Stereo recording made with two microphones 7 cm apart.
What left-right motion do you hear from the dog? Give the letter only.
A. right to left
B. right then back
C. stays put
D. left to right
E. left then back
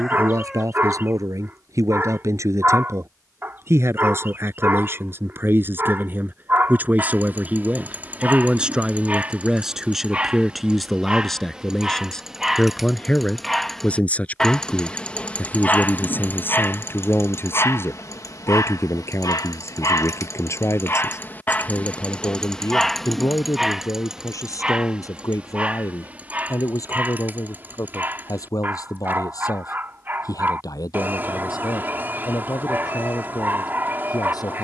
E.